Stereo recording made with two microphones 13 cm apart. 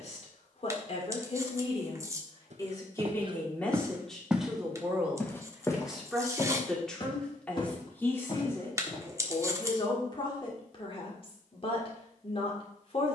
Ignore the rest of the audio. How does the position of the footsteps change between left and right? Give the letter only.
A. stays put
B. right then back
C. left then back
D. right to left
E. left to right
D.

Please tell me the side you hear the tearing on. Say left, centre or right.
right.